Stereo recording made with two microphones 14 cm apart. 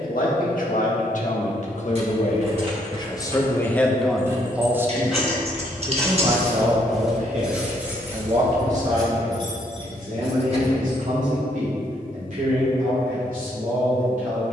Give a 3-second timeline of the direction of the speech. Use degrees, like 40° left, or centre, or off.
50° left, centre, 50° right, 60° right, 70° right.